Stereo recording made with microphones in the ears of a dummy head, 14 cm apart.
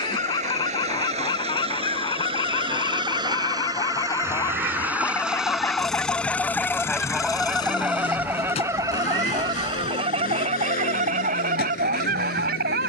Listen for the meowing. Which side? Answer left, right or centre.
right.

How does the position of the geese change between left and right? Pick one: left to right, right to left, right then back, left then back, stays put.
left to right.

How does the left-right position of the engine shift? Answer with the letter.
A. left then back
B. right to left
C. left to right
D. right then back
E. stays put
B.